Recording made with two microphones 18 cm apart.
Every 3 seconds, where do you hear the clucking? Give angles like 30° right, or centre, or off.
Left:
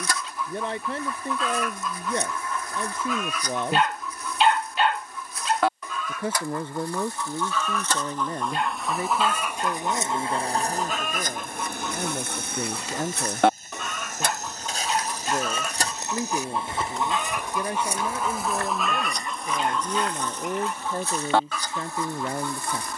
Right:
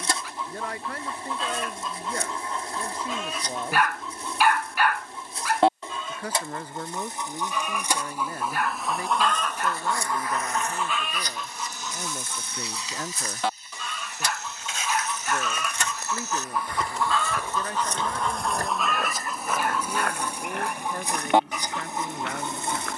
30° right, 30° right, 20° right, 30° left, 60° left, 30° left, centre, 20° right.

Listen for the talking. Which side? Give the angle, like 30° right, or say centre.
30° left.